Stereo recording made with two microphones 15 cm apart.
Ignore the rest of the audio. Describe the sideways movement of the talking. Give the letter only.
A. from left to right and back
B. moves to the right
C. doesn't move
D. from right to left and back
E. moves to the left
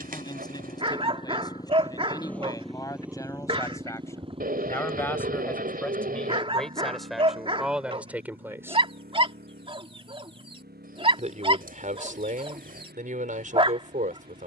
B.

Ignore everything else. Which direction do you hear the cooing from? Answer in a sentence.
You can hear the cooing on the right.